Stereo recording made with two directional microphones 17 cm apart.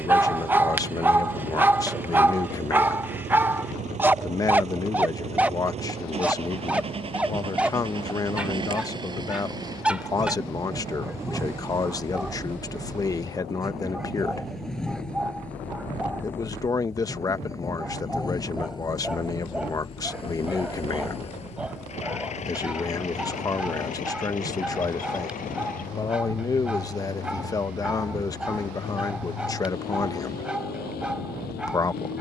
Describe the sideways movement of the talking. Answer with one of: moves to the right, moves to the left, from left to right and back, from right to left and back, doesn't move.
doesn't move.